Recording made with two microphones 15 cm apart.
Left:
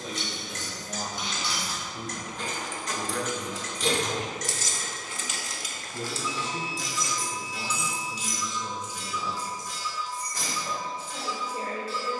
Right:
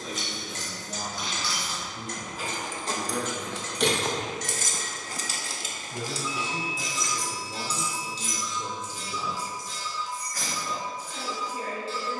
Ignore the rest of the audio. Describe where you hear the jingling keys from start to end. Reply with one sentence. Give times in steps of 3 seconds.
In this clip you hear the jingling keys in the centre from 0 s, on the right from 3 s, in the centre from 6 s and on the left from 9 s.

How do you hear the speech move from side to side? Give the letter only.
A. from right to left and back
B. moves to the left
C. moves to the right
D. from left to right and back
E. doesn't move
D.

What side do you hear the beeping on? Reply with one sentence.
You can hear the beeping on the left.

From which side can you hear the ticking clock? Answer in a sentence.
You can hear the ticking clock on the right.